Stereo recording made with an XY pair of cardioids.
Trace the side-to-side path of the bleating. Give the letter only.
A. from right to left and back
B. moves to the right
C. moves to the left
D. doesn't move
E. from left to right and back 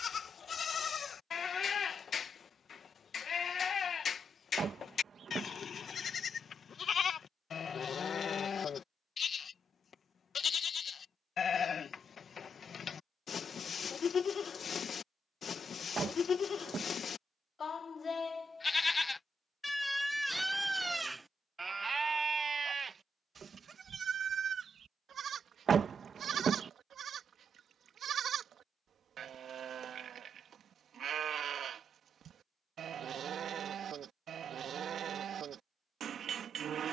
B.